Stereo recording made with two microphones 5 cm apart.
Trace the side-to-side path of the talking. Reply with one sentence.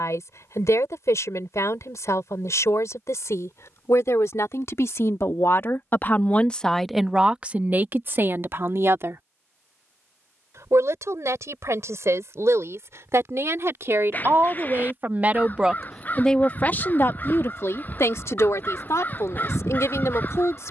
You can hear the talking move from left to right and back again.